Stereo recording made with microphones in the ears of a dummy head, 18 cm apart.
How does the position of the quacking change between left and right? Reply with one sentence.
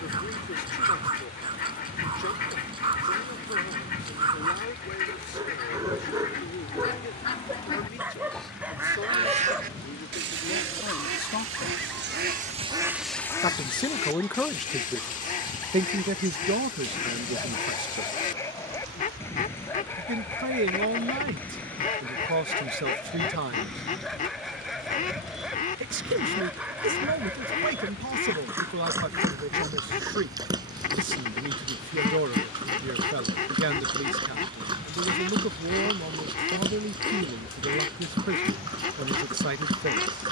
In this clip you hear the quacking move from left to right and back again.